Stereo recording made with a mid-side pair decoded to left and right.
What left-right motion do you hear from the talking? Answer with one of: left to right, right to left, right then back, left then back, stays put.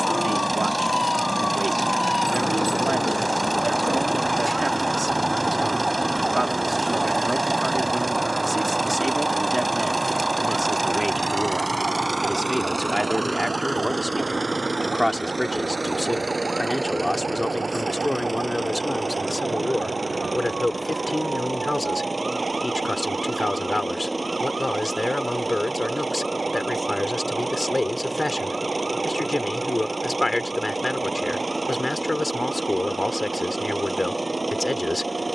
right to left.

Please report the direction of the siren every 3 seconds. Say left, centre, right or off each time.
left, centre, right, right, right, right, right, right, right, right, right, right.